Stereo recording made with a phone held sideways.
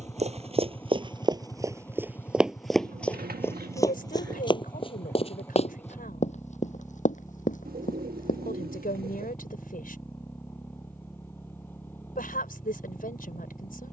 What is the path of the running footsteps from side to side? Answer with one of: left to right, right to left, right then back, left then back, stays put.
right to left.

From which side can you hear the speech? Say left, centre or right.
left.